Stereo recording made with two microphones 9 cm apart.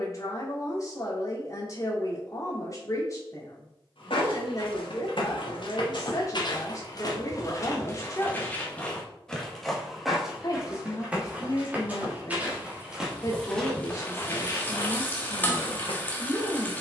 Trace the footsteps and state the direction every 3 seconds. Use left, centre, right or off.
off, left, left, centre, centre, left.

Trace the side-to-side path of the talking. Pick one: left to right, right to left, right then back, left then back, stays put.
stays put.